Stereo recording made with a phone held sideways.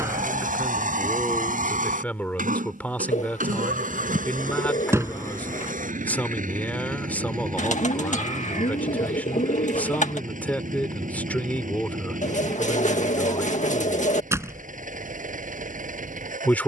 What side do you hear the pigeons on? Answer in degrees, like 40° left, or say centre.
50° left.